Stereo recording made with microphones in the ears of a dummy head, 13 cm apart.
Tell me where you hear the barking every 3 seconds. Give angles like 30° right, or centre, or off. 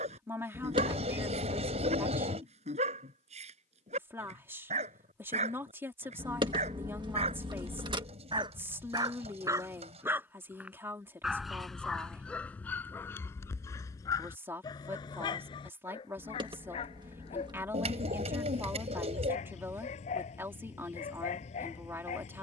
50° right, 50° right, 40° right, 10° right, 20° left, 40° left, 50° left, 50° left.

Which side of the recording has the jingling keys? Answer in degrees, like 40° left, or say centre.
30° right.